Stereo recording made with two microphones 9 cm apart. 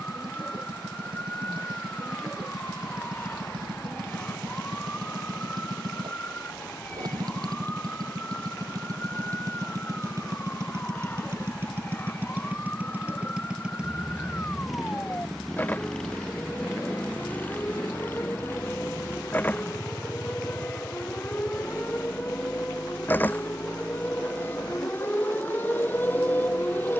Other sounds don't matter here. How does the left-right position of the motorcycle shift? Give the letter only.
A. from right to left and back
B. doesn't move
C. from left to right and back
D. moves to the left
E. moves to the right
D.